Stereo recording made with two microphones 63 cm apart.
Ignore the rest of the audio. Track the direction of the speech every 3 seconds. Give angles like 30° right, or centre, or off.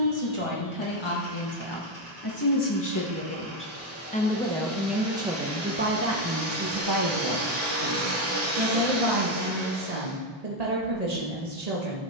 40° left, centre, 40° right, 60° right.